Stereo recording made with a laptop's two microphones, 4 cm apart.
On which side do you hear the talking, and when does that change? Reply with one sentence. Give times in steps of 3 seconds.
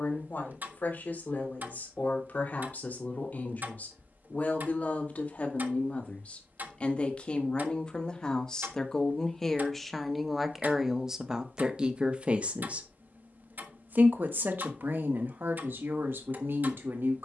In this clip you hear the talking on the left from 0 s, in the centre from 9 s and on the right from 12 s.